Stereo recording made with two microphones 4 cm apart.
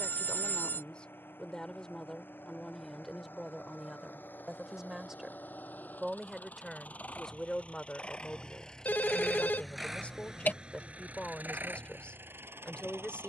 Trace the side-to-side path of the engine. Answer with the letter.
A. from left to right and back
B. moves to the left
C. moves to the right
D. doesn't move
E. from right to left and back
C.